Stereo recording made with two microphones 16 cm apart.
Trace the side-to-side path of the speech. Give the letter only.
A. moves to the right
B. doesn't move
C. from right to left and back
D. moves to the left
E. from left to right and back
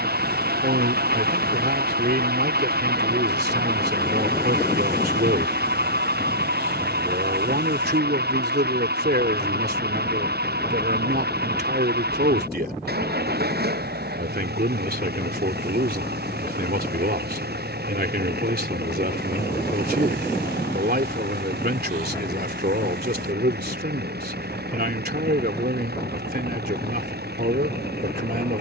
B.